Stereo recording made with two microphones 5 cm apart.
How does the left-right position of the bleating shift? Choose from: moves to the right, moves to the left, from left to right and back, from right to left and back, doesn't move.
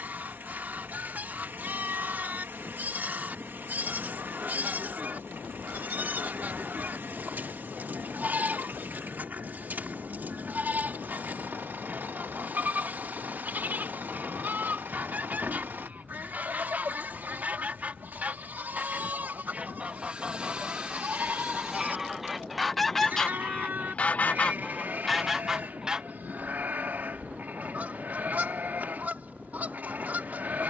doesn't move.